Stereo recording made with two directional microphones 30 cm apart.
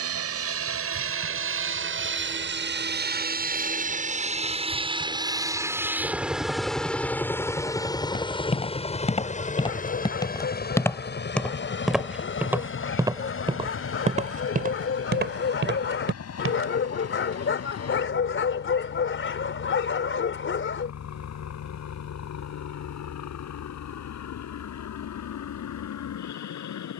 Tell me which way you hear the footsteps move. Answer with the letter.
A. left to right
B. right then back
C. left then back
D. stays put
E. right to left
A.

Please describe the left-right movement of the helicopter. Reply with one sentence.
In this clip you hear the helicopter go from the right side to the left.